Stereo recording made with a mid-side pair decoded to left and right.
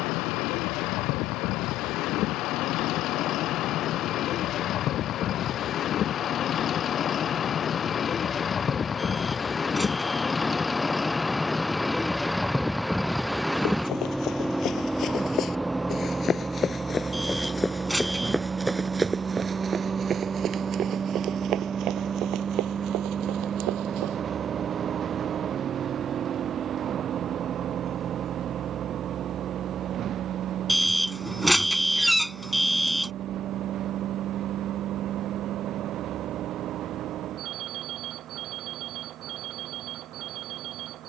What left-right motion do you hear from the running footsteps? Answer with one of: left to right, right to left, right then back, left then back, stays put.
left to right.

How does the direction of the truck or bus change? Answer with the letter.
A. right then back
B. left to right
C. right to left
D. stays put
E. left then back
B.